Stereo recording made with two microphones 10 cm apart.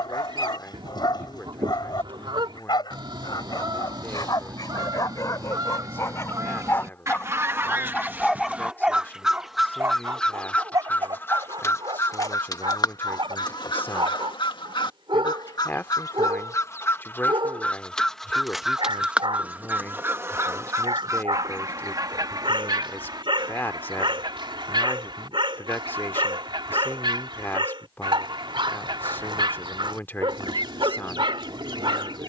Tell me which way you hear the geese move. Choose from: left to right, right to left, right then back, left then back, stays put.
left then back.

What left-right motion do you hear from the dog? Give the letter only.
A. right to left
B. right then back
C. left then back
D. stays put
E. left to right
E.